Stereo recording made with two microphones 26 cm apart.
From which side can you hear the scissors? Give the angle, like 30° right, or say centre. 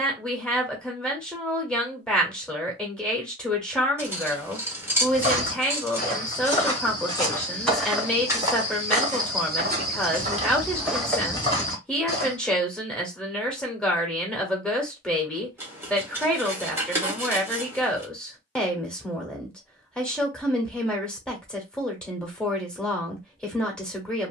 10° right.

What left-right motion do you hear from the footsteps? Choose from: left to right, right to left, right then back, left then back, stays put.
right then back.